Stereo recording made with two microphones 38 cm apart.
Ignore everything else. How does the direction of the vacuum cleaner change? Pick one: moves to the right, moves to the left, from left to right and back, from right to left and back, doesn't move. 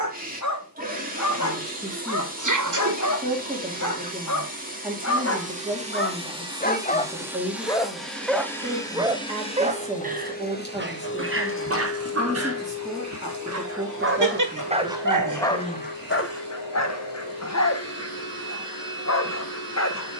moves to the left.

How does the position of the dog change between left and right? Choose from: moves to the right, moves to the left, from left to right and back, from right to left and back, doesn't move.
from left to right and back.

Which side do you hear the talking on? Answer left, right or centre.
centre.